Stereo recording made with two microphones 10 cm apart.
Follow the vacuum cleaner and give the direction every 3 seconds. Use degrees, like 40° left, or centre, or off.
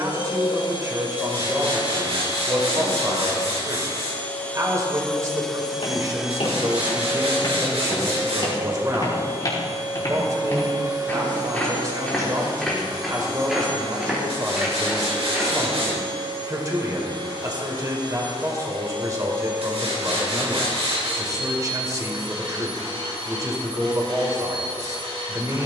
50° left, 20° left, 10° right, 40° right, 50° right, 60° right, 60° right, 60° right, 70° right.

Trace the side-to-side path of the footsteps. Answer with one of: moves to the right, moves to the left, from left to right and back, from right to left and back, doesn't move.
moves to the right.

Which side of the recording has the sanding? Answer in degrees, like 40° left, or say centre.
80° right.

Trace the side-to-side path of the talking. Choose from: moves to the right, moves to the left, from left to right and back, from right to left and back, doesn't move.
doesn't move.